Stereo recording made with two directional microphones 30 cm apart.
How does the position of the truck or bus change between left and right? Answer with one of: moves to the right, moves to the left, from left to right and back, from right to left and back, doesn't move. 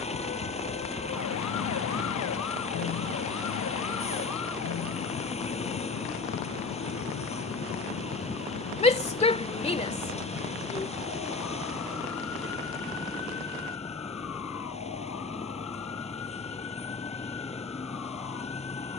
doesn't move.